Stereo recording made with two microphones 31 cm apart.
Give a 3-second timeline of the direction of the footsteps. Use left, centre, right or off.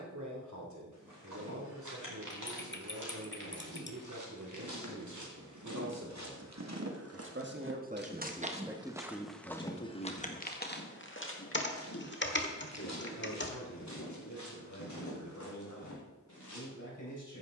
right, right, right, left, left, left.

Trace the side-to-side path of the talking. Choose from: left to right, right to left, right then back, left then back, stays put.
right to left.